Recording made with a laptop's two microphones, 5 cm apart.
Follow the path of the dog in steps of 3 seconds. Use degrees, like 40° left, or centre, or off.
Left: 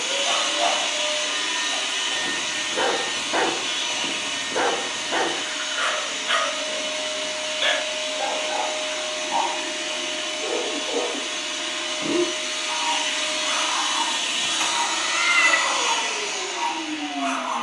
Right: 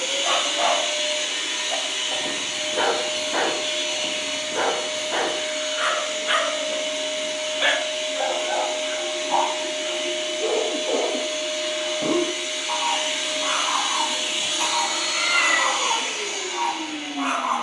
20° right, 10° left, 10° right, 30° right, 30° right, 30° right.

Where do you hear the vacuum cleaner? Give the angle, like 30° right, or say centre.
80° left.